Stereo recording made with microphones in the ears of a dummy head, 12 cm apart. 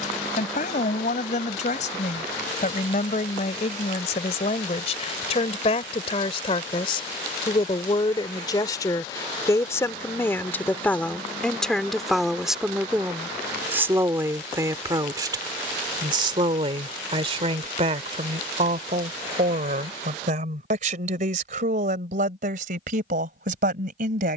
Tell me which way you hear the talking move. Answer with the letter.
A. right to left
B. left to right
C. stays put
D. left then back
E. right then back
B.